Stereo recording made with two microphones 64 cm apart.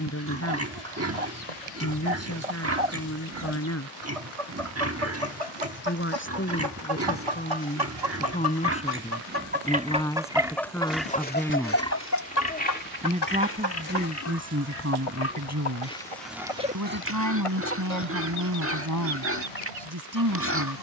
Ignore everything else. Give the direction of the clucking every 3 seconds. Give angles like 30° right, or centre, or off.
80° right, 70° right, 50° right, centre, 40° left, 60° left, 70° left.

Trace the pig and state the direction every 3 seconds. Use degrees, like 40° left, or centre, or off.
20° right, 20° right, 20° right, centre, 20° left, 10° right, 20° right.